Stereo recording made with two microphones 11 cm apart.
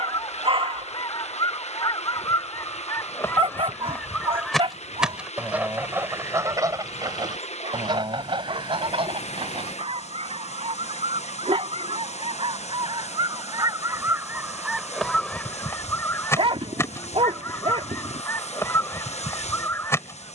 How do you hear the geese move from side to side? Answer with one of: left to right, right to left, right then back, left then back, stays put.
right then back.